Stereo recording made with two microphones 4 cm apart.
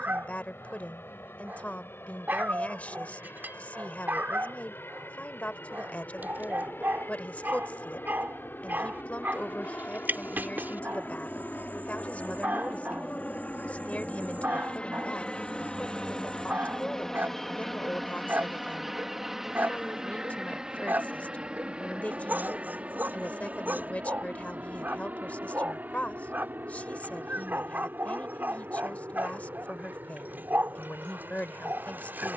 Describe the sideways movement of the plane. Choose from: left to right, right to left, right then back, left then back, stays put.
left to right.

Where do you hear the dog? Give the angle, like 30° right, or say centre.
50° right.